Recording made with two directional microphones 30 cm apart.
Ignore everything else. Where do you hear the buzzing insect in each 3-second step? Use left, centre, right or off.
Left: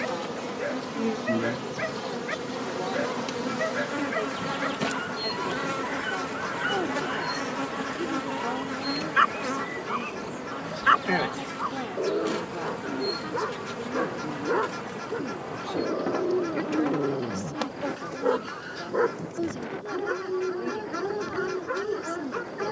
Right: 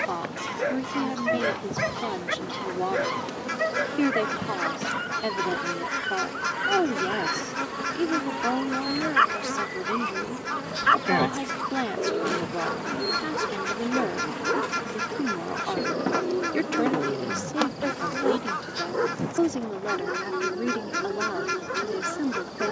left, left, centre, centre, right, right, right, right.